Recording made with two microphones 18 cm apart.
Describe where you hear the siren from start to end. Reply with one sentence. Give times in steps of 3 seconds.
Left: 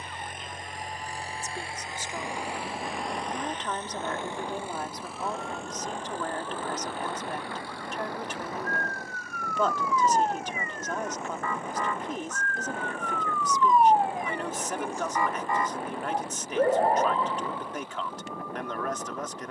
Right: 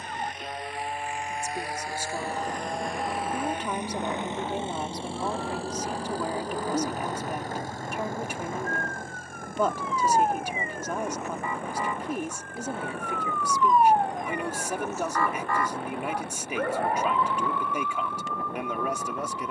You can hear the siren on the right from 0 s, in the centre from 12 s and on the left from 15 s.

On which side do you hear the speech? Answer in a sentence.
You can hear the speech in the centre.